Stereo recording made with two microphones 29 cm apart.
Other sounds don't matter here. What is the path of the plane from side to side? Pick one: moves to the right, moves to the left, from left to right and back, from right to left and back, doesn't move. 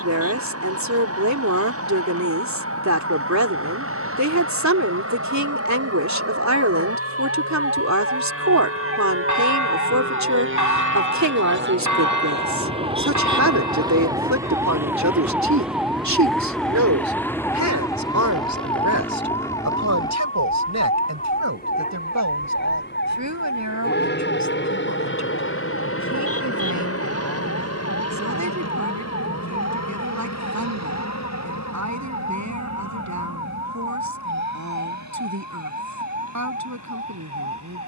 moves to the left.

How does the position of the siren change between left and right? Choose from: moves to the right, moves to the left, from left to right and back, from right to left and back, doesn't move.
moves to the left.